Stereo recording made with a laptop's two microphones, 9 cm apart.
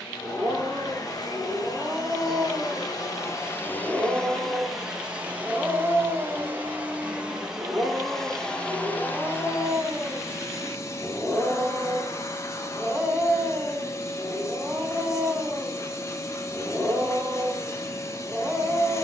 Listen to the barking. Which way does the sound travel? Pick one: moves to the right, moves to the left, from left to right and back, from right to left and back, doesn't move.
doesn't move.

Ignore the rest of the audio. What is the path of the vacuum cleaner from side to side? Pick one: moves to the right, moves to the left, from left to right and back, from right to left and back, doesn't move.
from left to right and back.